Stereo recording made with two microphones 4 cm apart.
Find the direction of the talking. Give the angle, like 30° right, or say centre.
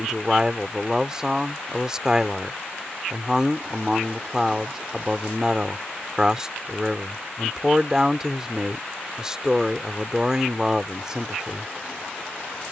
20° right.